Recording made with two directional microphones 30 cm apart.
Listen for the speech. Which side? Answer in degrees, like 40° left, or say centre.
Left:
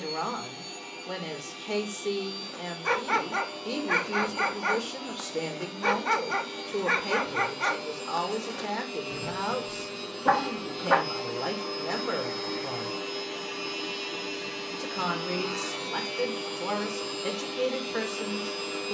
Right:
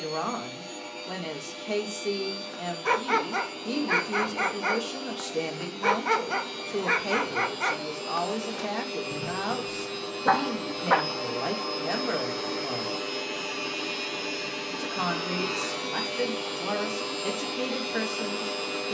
centre.